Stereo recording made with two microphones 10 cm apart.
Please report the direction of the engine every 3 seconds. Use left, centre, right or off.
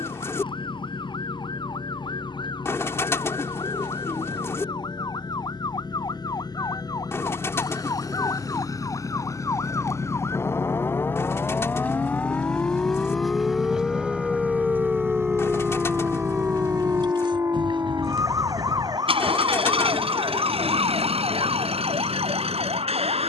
left, left, left, left, centre, right, right, right.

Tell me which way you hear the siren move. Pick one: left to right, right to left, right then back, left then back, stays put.
left to right.